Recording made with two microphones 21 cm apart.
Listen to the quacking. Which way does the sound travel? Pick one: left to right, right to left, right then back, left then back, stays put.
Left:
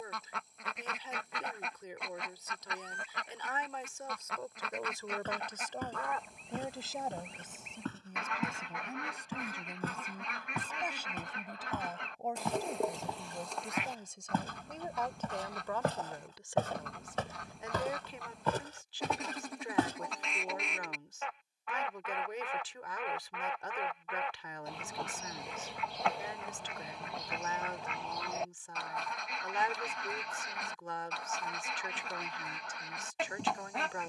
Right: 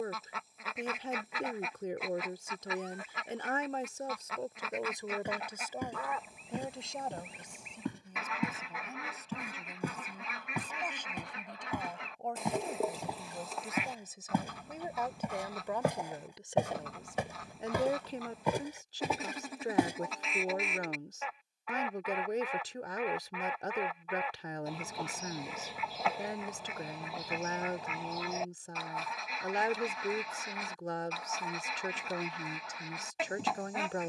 stays put.